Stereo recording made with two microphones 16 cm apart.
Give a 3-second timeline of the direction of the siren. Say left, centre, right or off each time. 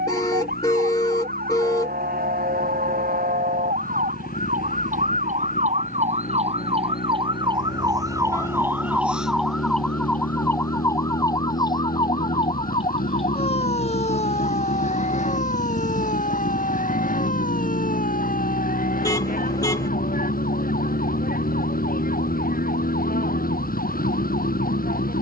right, right, right, centre, left, left, left, left, left.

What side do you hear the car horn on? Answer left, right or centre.
left.